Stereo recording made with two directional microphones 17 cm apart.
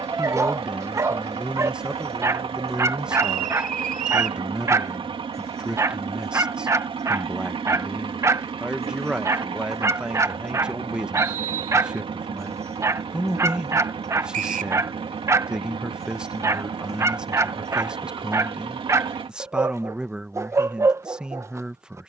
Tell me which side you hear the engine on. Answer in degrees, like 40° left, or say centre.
30° right.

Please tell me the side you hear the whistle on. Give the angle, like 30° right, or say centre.
50° right.